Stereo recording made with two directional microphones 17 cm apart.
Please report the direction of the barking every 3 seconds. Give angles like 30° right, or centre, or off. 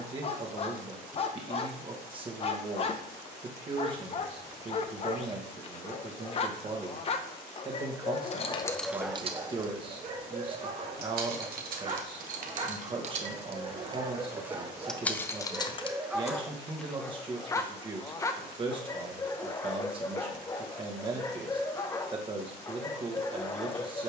40° left, 40° left, 30° left, 30° right, 30° right, centre, 20° left, 20° left.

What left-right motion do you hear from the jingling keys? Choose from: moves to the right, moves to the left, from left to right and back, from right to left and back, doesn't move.
from left to right and back.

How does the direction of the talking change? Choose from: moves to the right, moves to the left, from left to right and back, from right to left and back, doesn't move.
doesn't move.